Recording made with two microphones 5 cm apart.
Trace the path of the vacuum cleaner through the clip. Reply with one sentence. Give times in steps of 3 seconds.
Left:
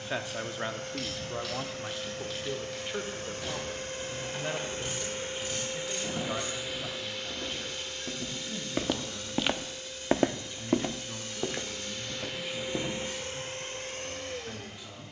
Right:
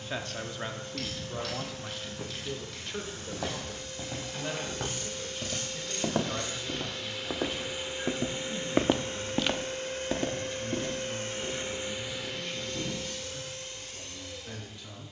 You can hear the vacuum cleaner on the left from 0 s, in the centre from 6 s, on the right from 9 s and on the left from 12 s.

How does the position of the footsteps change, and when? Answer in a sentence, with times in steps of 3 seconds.
In this clip you hear the footsteps on the right from 0 s and on the left from 9 s.